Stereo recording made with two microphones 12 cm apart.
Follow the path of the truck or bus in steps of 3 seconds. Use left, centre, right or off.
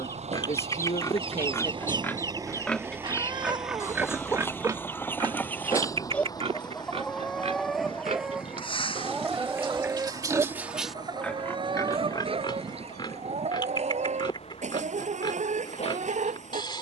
right, centre, left, left, left, left.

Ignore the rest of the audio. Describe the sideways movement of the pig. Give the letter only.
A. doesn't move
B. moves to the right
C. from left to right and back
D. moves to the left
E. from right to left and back
C.